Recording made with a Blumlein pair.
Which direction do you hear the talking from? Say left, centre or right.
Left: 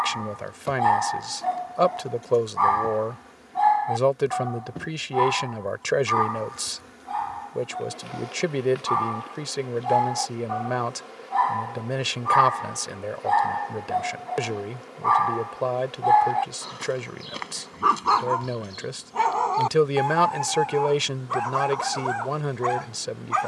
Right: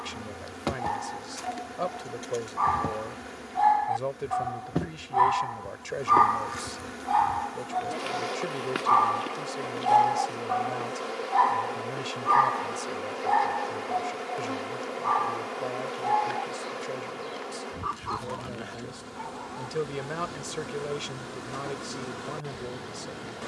left.